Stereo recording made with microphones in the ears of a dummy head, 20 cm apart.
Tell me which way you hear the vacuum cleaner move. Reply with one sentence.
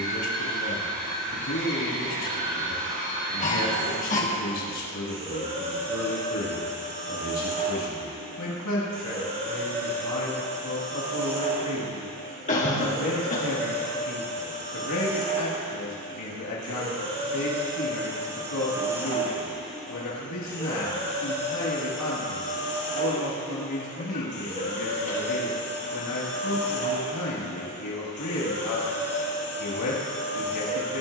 In this clip you hear the vacuum cleaner move to the left.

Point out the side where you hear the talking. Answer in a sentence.
You can hear the talking on the left.